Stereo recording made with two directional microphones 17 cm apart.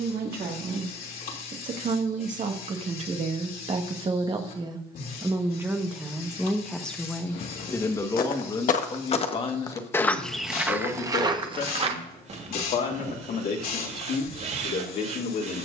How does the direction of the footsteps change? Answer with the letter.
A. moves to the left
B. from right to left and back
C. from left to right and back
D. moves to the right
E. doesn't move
D.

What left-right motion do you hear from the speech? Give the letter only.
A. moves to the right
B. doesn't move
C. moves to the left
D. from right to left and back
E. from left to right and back
C.